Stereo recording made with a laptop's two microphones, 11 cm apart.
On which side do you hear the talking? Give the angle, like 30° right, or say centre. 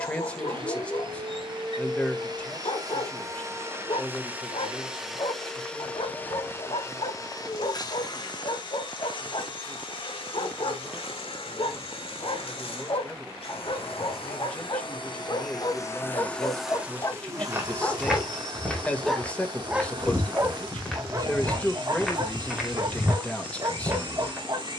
10° left.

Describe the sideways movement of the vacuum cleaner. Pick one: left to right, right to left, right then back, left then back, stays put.
left then back.